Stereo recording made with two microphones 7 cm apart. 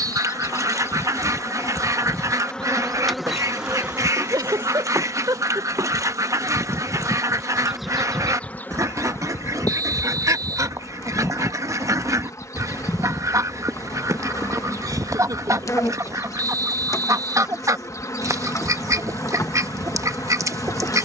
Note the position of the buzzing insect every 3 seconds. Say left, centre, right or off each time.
left, right, centre, left, left, left, left.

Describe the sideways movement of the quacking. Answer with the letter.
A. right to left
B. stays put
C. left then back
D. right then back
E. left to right
B.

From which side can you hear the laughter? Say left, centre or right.
right.